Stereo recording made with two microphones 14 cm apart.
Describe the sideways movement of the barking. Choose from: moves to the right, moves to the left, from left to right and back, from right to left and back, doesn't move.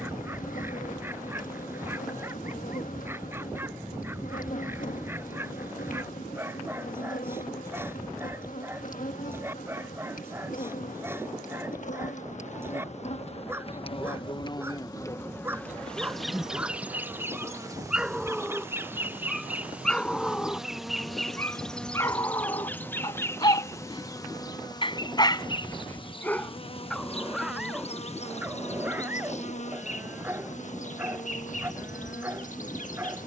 from right to left and back.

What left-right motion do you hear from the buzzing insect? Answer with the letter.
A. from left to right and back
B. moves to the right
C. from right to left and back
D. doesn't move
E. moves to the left
A.